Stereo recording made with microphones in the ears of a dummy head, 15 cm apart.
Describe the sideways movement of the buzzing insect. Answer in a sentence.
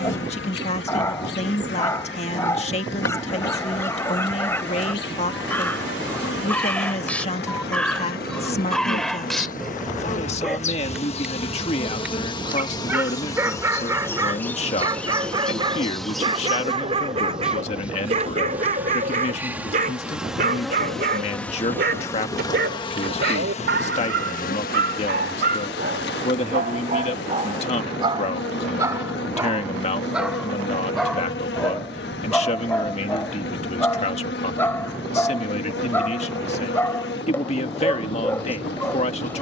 In this clip you hear the buzzing insect move from left to right and back again.